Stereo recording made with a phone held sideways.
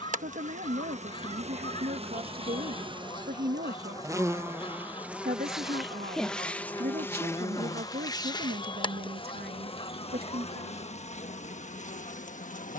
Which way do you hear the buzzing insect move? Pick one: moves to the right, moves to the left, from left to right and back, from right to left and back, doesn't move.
moves to the left.